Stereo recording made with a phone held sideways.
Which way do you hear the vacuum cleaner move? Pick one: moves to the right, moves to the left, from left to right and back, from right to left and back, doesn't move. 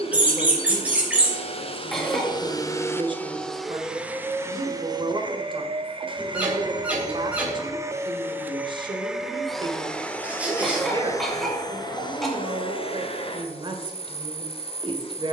from left to right and back.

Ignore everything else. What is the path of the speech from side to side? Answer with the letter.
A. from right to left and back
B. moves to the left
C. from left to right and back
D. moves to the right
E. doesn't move
E.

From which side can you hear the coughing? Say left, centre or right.
centre.